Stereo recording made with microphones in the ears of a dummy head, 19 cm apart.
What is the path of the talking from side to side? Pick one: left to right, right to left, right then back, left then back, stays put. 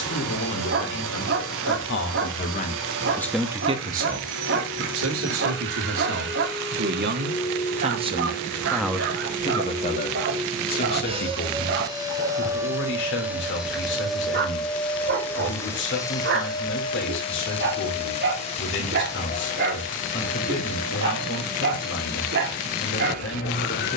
right then back.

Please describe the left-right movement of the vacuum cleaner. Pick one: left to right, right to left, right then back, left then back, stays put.
right to left.